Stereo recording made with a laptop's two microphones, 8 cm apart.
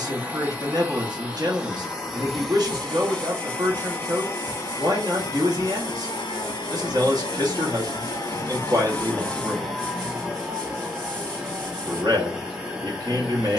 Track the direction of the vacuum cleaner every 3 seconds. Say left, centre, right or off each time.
centre, left, left, centre, centre.